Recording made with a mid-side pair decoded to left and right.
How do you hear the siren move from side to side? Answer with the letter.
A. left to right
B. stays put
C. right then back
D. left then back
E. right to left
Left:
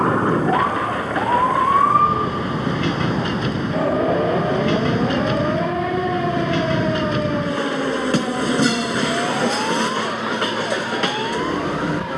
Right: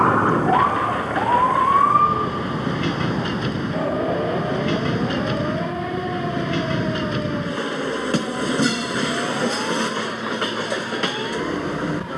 E.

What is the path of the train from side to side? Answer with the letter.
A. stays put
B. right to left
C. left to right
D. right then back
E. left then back
A.